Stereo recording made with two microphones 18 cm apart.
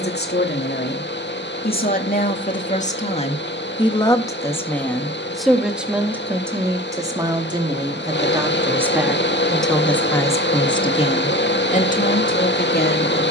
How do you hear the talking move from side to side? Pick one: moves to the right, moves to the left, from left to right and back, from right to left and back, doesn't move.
from left to right and back.